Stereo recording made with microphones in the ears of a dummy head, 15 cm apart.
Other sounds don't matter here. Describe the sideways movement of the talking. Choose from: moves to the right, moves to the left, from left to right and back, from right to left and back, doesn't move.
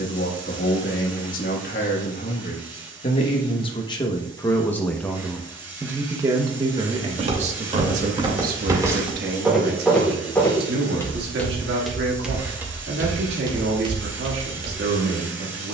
moves to the right.